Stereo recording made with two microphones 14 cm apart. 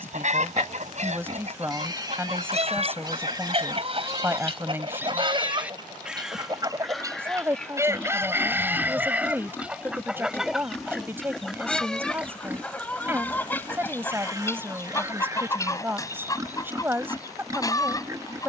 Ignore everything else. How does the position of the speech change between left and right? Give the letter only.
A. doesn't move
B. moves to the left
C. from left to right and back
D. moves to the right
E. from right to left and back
A.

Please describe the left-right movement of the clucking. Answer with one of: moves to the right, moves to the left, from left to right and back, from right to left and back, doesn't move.
moves to the left.